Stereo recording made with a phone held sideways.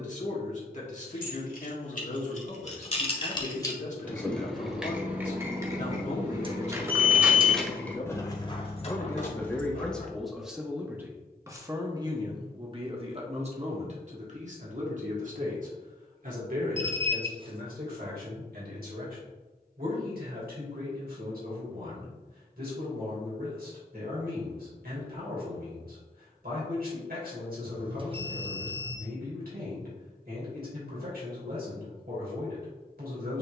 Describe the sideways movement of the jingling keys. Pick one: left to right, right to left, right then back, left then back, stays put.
right then back.